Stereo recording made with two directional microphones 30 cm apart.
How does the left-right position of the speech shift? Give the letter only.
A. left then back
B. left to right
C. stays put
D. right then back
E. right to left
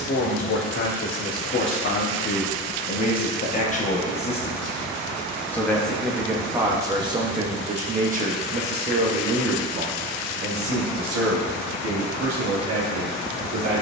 B.